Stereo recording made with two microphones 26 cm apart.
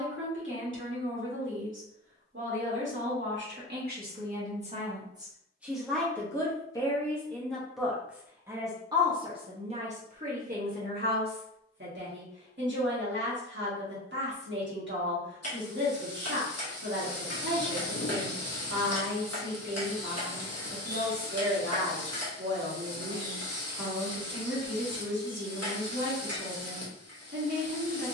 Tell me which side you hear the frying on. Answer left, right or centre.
left.